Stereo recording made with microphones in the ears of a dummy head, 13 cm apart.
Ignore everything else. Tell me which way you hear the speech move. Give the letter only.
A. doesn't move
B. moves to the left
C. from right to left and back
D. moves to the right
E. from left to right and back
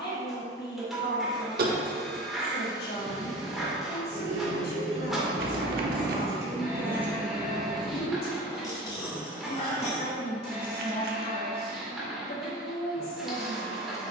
A.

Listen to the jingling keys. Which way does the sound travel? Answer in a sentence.
You can hear the jingling keys travel towards the left.